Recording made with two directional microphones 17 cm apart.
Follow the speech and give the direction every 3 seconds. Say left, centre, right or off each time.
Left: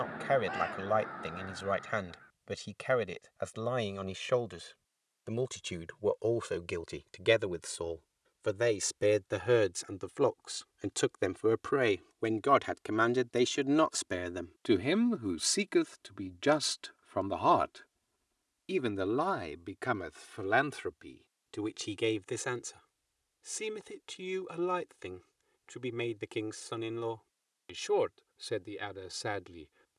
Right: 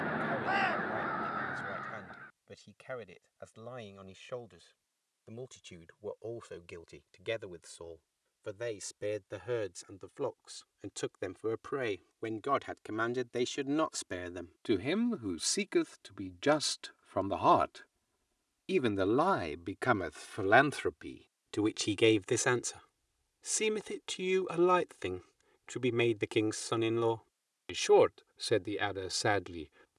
left, left, left, left, left, centre, right, right, right, right.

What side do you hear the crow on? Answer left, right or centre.
right.